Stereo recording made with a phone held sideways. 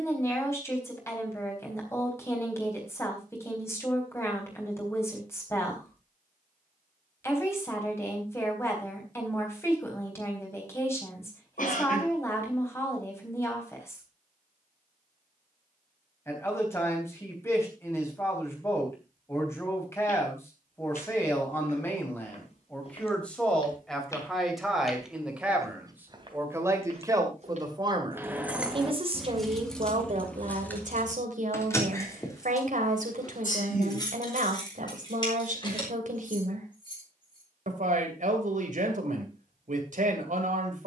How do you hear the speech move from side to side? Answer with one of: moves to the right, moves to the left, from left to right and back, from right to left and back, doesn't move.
moves to the right.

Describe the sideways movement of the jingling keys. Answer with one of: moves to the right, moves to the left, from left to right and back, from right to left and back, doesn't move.
moves to the left.